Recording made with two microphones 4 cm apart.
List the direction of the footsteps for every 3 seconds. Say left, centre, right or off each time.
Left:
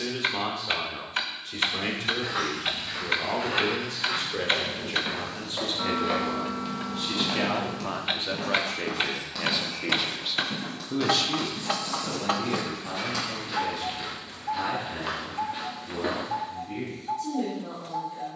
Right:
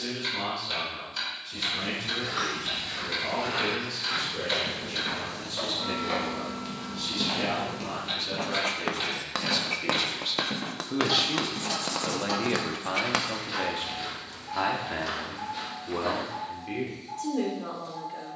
left, left, centre, right, centre, left.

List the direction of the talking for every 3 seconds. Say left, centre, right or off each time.
left, left, left, centre, right, right.